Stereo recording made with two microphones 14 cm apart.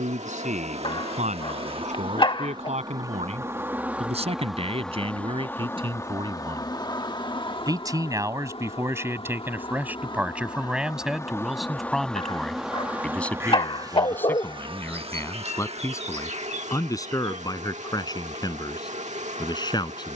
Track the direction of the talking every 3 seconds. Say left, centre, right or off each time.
right, right, right, centre, centre, left, left.